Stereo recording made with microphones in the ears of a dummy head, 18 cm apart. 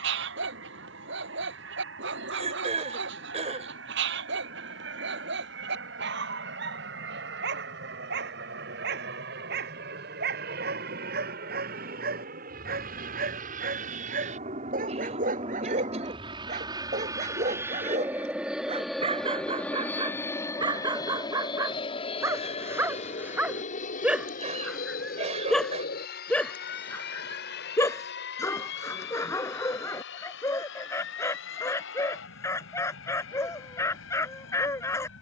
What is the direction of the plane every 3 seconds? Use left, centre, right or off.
right, right, right, right, right, right, centre, left, left, left, left, left.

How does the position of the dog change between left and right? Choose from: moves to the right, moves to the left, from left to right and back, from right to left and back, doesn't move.
moves to the left.